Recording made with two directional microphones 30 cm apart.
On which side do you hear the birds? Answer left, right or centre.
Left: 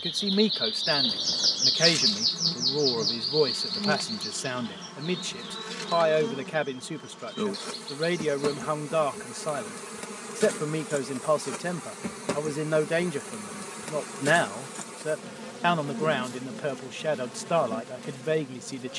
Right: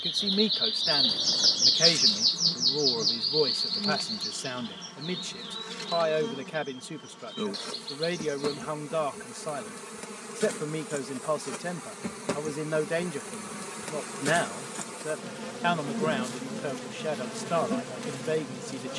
centre.